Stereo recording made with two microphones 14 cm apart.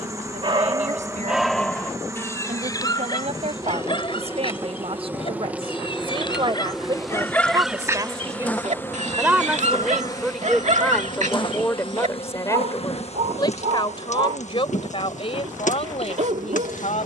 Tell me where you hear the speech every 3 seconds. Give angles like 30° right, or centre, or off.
60° right, 50° right, 30° right, centre, 30° left, 50° left.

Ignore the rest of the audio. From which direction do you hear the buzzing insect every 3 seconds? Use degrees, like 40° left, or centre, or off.
20° right, 20° right, centre, 30° left, 50° left, 70° left.